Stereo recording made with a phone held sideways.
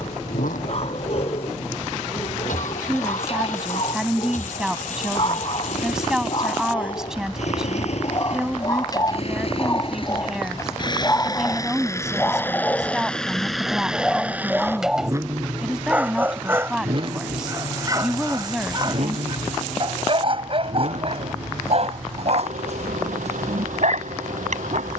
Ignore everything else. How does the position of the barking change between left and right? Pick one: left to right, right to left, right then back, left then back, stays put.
left to right.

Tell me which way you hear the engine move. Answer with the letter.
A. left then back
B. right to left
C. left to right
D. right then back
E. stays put
C.